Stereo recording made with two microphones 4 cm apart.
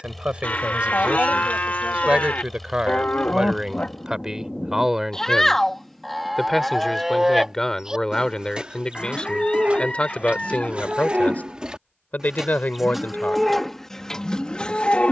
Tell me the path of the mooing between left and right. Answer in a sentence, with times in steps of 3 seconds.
You can hear the mooing on the left from 0 s, in the centre from 6 s, on the right from 9 s and in the centre from 12 s.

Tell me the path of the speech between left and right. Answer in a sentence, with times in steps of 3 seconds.
In this clip you hear the speech on the right from 0 s, in the centre from 3 s and on the left from 9 s.